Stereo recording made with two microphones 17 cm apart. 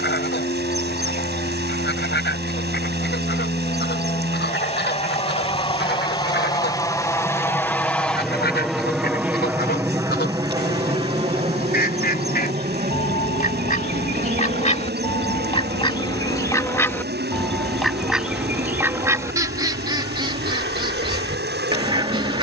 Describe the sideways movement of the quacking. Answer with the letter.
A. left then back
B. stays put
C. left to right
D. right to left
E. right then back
C.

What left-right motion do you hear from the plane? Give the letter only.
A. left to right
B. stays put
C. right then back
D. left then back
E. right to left
A.